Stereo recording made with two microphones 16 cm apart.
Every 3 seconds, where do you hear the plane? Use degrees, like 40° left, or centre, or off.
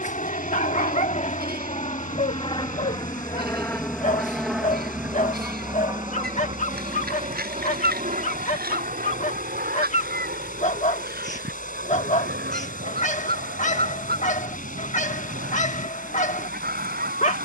50° left, centre, 40° right, 60° right, 70° right, 70° right.